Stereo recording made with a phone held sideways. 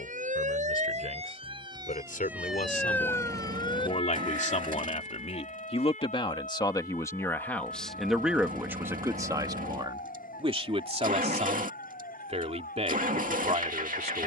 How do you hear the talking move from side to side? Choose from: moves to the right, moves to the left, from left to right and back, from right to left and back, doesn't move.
moves to the right.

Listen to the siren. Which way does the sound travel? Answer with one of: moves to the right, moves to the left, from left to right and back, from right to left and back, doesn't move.
moves to the left.